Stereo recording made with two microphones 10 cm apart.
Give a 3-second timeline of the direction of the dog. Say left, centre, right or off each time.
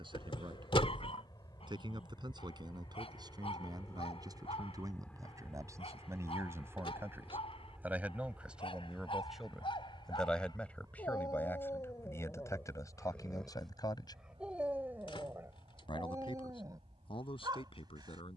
left, left, left, left, centre, right.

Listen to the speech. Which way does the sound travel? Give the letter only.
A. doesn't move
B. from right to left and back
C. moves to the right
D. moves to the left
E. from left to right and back
D.